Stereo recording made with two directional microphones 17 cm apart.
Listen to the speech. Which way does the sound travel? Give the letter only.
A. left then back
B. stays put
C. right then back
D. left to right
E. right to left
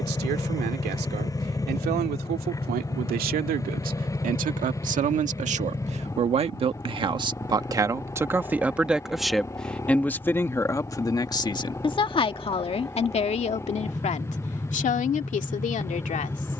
E.